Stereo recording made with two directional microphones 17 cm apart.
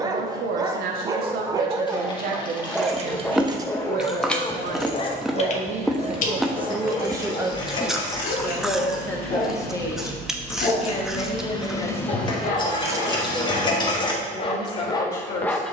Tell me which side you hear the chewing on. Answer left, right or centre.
centre.